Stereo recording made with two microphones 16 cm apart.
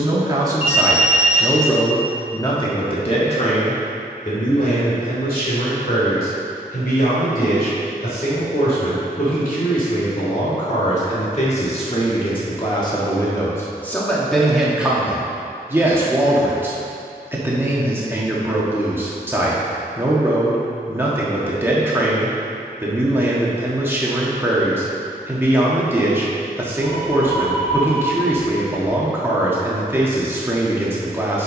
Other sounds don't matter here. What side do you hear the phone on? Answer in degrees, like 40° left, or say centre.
40° left.